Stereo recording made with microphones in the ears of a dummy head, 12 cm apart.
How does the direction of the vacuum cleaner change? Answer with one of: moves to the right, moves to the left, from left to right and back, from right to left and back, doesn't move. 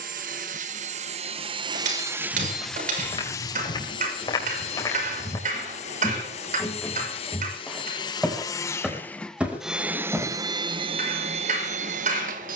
from right to left and back.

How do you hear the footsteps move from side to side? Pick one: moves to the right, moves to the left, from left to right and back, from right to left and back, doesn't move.
moves to the right.